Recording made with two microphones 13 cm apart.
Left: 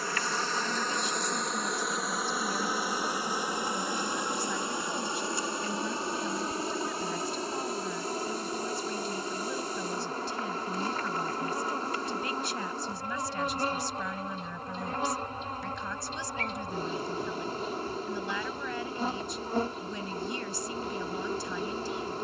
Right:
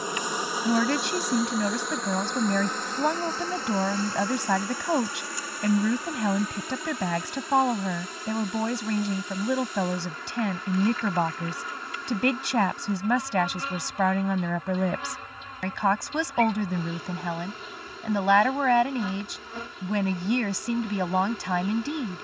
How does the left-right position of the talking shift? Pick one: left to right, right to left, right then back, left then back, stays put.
stays put.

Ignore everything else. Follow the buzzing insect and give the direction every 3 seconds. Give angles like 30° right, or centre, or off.
centre, 20° left, 30° left, 40° left, 40° left, 40° left, 40° left, 40° left.